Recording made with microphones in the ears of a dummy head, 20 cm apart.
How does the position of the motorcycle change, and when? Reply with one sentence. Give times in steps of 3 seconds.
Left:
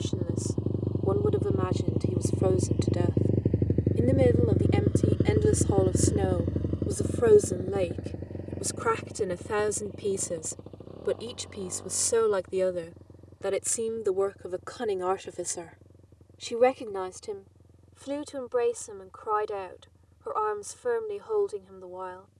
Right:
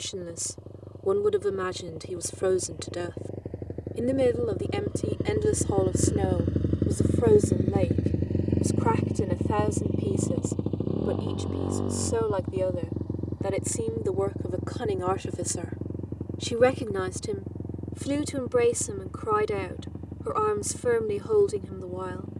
In this clip you hear the motorcycle on the left from 0 s and on the right from 6 s.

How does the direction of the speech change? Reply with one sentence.
You can hear the speech go left and come back.